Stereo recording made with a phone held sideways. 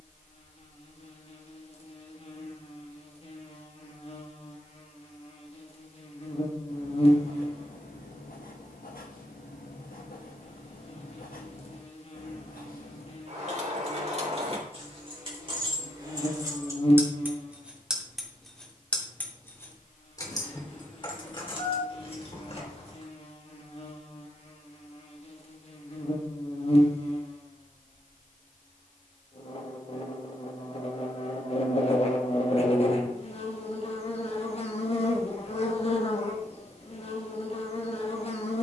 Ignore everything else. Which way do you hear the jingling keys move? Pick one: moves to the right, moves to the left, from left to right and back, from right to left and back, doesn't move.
moves to the left.